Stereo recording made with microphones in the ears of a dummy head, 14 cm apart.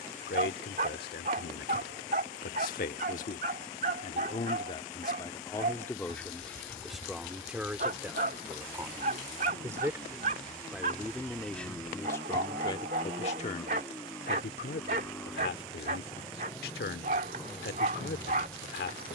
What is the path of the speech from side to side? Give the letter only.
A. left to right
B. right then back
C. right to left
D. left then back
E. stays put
B.